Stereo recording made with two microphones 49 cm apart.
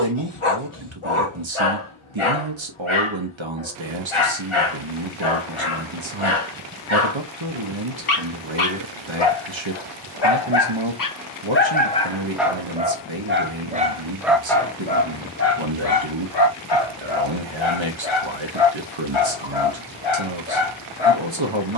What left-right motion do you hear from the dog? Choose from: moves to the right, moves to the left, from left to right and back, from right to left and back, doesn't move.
from left to right and back.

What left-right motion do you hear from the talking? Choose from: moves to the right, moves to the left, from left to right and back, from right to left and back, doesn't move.
doesn't move.